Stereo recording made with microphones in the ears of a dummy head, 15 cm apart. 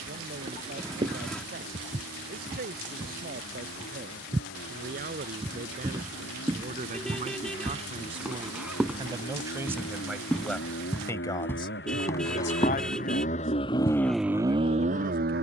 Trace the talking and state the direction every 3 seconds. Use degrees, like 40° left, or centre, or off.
60° right, 60° right, 40° right, centre, 60° left.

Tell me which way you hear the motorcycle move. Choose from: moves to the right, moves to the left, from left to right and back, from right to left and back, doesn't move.
moves to the right.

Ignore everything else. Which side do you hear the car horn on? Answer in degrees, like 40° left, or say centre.
centre.